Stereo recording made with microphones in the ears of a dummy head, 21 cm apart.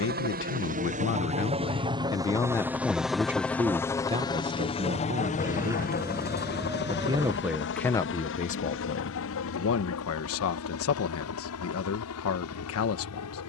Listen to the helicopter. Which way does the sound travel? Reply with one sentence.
You can hear the helicopter go from the right side to the left.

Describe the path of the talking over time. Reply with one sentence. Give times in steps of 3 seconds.
You can hear the talking on the left from 0 s, on the right from 3 s, in the centre from 6 s and on the left from 9 s.